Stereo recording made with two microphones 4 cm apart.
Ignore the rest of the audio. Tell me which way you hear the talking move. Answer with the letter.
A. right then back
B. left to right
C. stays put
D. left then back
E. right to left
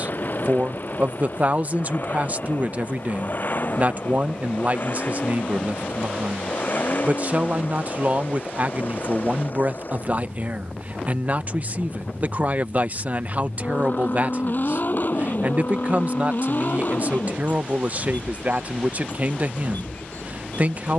C.